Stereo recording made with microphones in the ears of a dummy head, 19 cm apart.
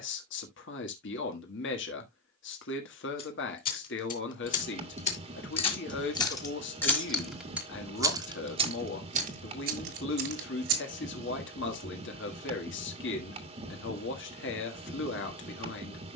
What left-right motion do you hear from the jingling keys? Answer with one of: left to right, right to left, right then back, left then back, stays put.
left to right.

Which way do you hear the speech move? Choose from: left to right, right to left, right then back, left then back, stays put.
stays put.